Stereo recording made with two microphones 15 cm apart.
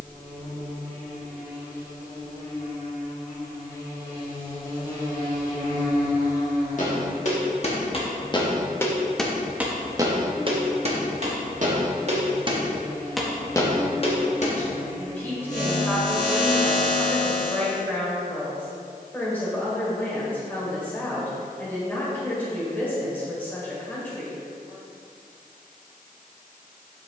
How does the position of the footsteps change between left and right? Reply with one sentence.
You can hear the footsteps move from left to right and back again.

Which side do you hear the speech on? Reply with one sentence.
You can hear the speech in the centre.